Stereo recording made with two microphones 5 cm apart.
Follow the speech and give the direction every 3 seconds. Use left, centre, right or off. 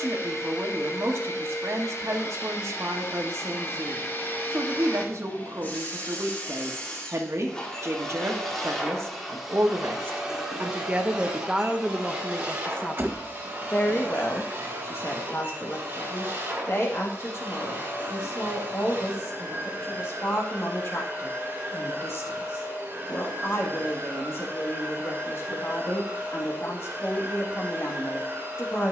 right, right, right, right, left, left, left, left, left, left.